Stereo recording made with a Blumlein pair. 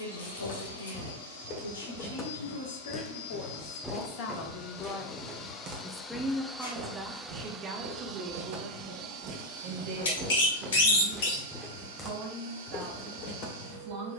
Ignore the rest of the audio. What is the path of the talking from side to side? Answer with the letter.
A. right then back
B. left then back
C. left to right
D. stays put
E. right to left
C.